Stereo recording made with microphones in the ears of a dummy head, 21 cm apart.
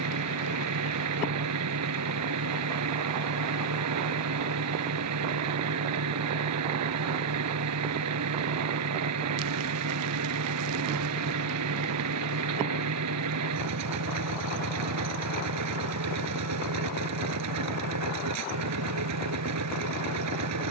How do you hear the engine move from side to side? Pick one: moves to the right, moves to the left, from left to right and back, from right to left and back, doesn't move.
doesn't move.